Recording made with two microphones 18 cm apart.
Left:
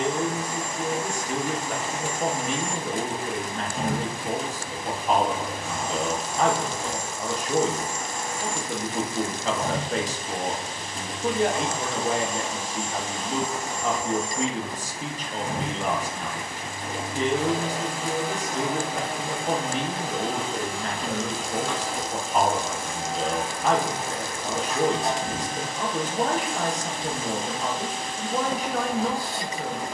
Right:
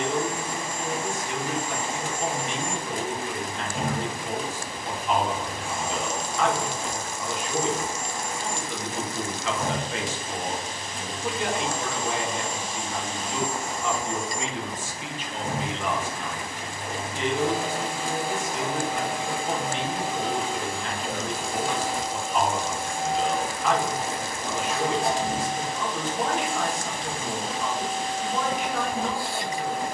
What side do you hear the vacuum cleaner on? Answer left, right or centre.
centre.